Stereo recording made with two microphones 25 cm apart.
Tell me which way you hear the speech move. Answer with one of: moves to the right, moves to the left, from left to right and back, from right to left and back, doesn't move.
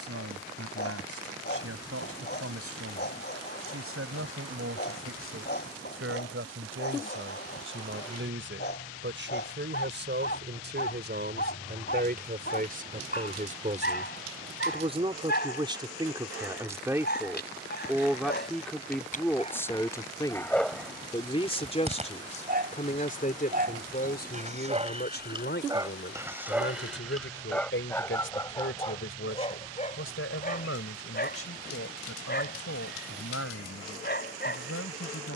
moves to the left.